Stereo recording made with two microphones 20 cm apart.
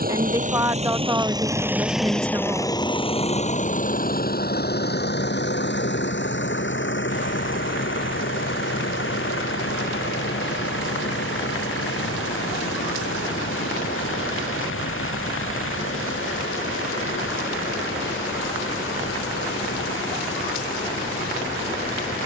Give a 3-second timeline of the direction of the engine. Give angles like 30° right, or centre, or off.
10° right, 50° left, 70° left, 70° left, 80° left, 80° left, 80° left, 80° left.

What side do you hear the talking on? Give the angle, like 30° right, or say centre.
20° right.